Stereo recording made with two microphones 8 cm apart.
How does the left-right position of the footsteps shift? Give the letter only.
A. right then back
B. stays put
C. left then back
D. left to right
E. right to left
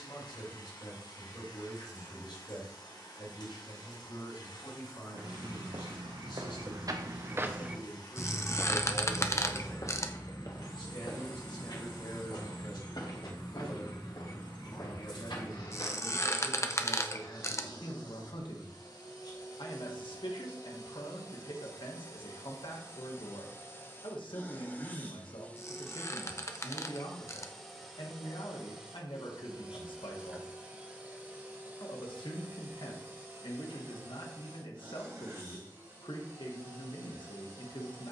E.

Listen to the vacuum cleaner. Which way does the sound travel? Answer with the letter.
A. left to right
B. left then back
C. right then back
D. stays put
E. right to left
A.